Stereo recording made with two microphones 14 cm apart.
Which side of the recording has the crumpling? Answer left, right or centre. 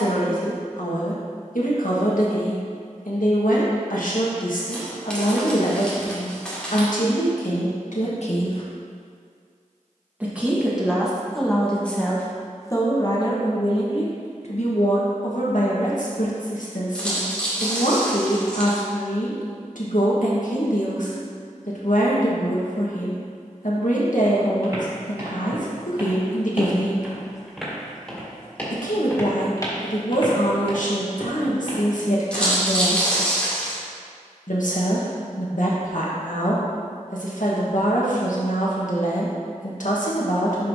centre.